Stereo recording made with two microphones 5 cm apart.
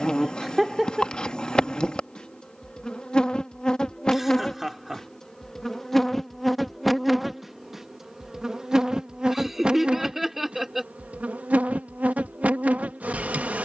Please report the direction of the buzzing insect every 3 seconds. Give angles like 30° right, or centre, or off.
20° left, 10° left, centre, 20° right, 30° right.